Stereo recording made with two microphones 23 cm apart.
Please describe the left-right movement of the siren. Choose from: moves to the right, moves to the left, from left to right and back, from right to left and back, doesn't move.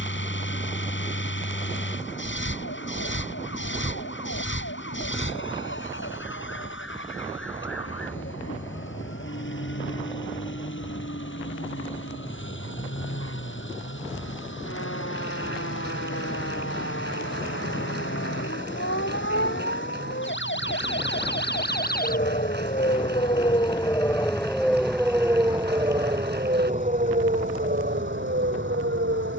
moves to the right.